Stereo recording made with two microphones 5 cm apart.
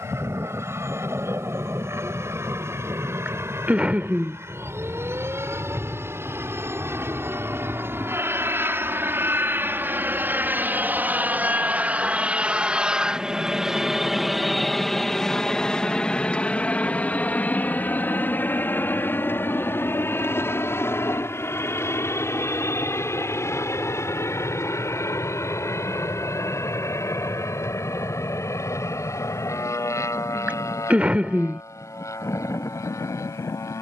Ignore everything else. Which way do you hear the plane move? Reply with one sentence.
You can hear the plane go from the right side to the left.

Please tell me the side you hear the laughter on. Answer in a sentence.
In this clip you hear the laughter on the right.